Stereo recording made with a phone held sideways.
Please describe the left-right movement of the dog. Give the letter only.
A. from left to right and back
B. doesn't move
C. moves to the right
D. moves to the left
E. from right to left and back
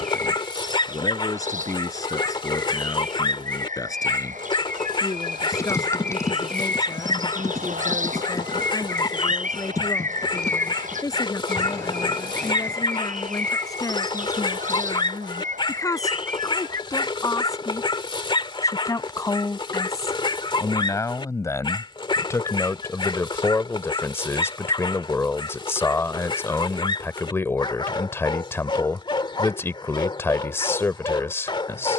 B.